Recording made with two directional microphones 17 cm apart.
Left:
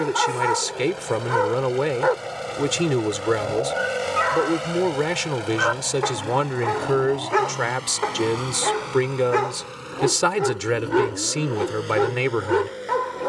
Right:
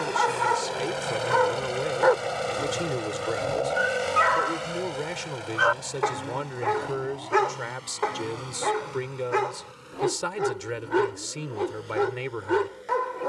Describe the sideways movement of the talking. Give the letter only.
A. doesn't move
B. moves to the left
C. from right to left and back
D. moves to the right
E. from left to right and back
A.